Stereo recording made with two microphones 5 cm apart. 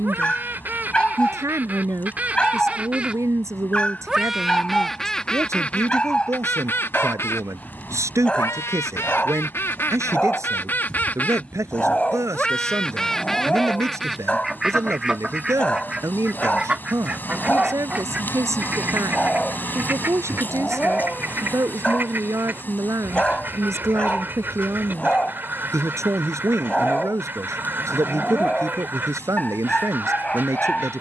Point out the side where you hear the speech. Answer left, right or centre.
right.